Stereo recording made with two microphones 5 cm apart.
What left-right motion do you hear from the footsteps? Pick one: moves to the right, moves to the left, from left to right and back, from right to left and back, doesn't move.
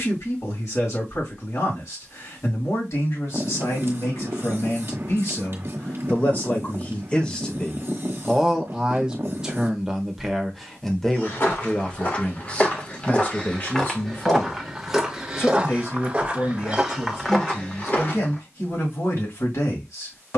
from left to right and back.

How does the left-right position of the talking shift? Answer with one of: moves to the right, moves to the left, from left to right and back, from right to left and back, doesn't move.
from left to right and back.